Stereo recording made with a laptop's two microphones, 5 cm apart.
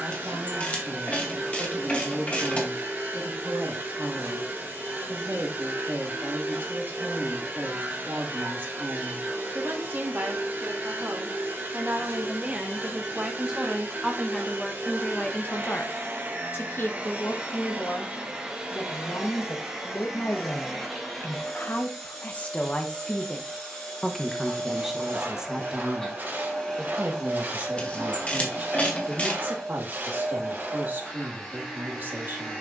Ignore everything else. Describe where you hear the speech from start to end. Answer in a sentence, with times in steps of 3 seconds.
In this clip you hear the speech on the right from 0 s, in the centre from 12 s, on the left from 15 s, in the centre from 24 s and on the right from 27 s.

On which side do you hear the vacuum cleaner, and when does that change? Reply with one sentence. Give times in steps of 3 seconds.
In this clip you hear the vacuum cleaner on the right from 0 s and in the centre from 18 s.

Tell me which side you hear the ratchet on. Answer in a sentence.
In this clip you hear the ratchet on the left.